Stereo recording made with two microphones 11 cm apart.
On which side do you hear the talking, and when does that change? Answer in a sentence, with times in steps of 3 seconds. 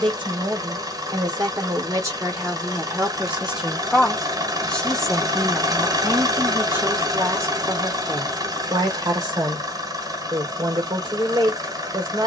You can hear the talking on the right from 0 s, in the centre from 3 s and on the right from 6 s.